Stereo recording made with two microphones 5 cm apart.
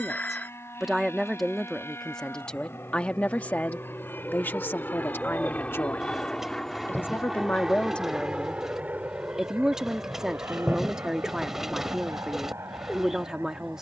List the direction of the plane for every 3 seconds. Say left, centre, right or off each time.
left, left, centre, right, right.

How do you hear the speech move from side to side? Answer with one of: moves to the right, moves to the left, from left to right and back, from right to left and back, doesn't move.
from right to left and back.